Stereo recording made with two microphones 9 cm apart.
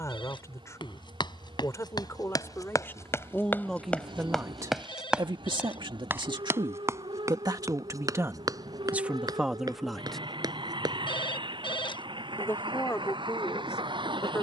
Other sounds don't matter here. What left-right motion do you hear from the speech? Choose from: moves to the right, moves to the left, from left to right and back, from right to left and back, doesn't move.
from left to right and back.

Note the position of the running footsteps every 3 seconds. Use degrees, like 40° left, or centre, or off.
50° left, 10° left, 40° right, 50° right, off.